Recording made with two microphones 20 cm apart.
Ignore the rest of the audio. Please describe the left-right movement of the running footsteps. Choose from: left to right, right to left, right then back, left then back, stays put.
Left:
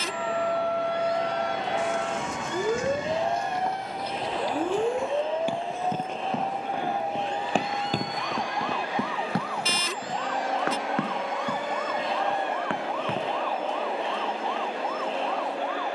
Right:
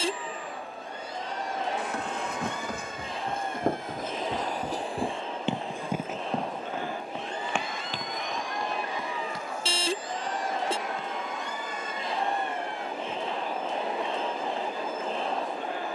right to left.